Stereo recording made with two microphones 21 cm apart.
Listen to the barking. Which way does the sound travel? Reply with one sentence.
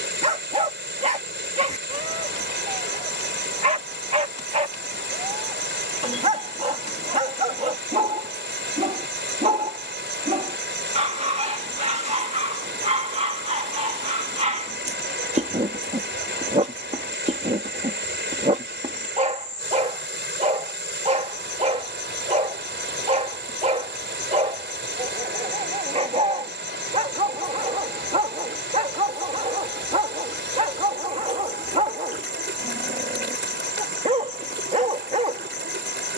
In this clip you hear the barking stay put.